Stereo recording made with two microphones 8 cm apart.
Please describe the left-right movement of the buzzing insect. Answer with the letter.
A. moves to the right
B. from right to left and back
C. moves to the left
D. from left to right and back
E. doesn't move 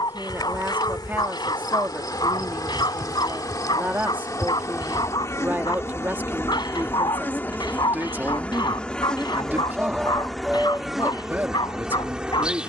A.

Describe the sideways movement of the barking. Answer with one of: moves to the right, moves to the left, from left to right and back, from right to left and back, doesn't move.
doesn't move.